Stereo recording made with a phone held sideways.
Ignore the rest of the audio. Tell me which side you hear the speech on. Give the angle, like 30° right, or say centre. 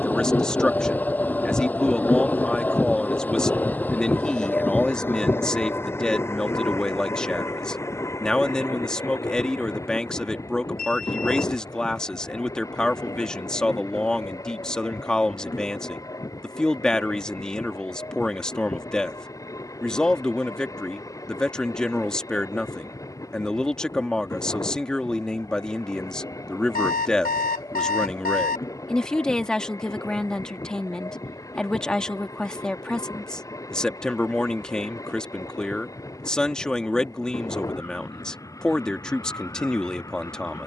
10° left.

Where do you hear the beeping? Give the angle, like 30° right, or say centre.
70° left.